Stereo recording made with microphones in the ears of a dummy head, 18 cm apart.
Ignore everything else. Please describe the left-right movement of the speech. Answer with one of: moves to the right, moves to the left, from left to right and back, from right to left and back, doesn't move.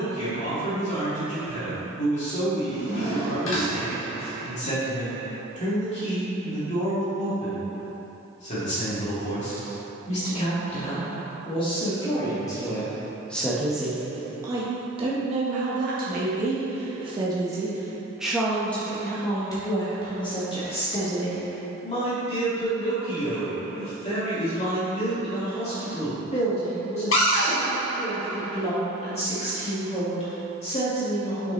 from left to right and back.